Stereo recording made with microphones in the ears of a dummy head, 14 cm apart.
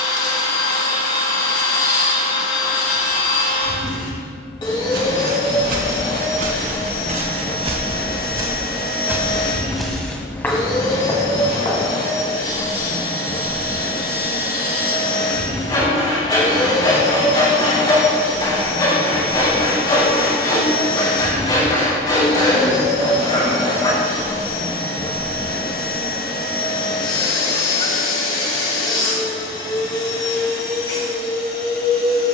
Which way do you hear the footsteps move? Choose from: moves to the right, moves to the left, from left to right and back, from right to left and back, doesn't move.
moves to the left.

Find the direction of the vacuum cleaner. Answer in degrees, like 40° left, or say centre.
30° left.